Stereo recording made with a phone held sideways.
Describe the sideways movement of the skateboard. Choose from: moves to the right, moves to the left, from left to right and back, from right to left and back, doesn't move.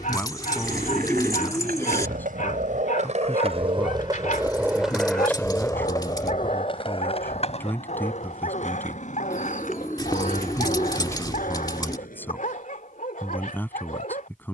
moves to the left.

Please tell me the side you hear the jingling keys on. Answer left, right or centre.
left.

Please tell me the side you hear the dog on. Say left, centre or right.
left.